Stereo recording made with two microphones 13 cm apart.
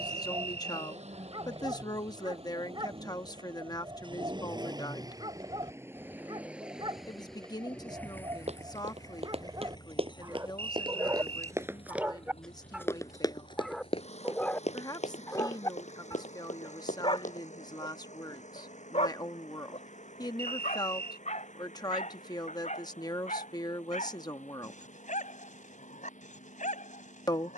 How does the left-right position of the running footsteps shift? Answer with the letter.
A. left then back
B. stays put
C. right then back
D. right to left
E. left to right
D.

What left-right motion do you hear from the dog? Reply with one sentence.
In this clip you hear the dog move from right to left.